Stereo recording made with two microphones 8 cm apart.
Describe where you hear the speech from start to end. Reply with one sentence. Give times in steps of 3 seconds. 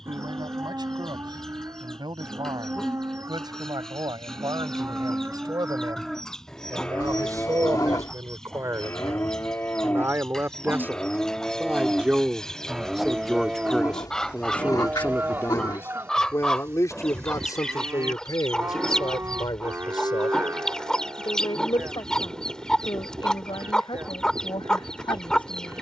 In this clip you hear the speech on the right from 0 s, in the centre from 12 s and on the left from 15 s.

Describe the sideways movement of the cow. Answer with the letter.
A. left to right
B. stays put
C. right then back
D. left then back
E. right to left
D.